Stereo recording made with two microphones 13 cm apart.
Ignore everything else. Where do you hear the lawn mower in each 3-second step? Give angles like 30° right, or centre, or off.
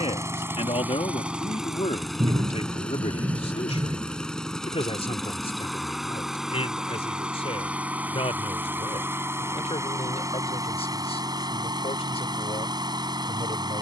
10° right, centre, 10° right, 30° right, 30° right.